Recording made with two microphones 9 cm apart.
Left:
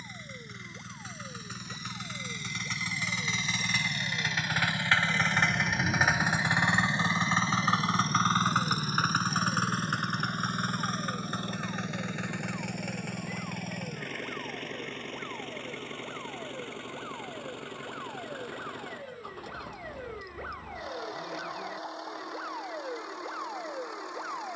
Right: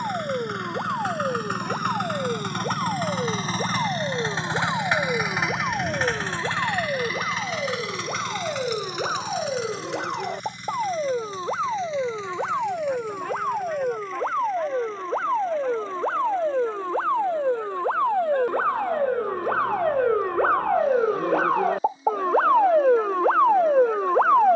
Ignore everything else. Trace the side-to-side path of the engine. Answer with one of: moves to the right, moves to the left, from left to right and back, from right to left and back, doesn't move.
moves to the left.